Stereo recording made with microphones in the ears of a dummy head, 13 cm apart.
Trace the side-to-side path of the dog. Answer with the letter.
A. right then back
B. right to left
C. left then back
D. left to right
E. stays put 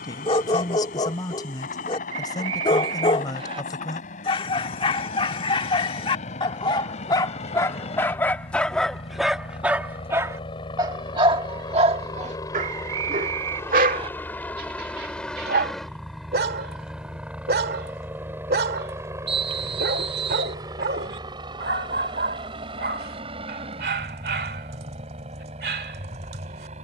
D.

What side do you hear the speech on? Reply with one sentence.
You can hear the speech on the left.